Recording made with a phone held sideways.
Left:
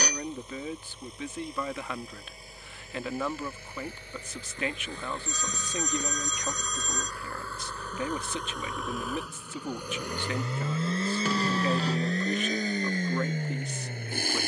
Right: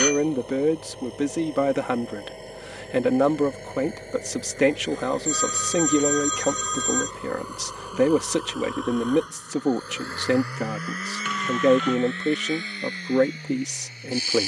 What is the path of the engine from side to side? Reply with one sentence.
In this clip you hear the engine go from the right side to the left.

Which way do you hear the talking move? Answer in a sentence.
You can hear the talking stay in one place.